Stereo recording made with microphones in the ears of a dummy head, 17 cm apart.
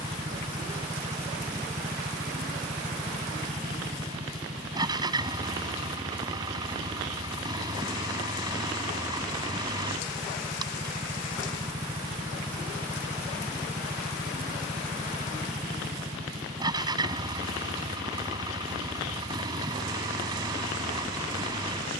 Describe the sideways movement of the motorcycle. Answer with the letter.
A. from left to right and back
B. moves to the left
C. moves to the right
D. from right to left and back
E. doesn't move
E.